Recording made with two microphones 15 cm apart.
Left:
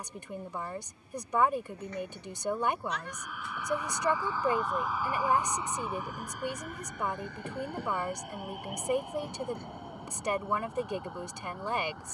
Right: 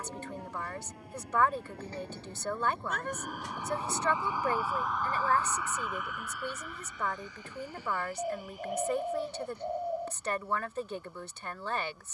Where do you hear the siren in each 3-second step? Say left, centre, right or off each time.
right, centre, left, left.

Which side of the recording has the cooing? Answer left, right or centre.
right.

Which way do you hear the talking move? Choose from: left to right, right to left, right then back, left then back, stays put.
stays put.